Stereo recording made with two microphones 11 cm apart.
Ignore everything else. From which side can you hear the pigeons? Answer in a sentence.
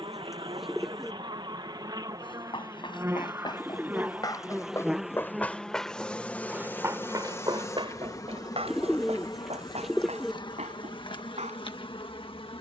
You can hear the pigeons in the centre.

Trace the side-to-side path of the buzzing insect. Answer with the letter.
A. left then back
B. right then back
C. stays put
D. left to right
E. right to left
E.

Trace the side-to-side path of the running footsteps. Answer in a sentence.
You can hear the running footsteps move to the right.